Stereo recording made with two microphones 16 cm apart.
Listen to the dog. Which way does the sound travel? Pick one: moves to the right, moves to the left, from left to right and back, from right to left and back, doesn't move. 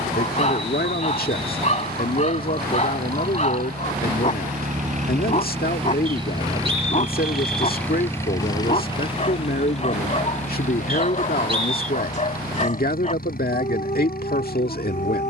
doesn't move.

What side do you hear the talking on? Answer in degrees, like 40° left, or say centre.
70° left.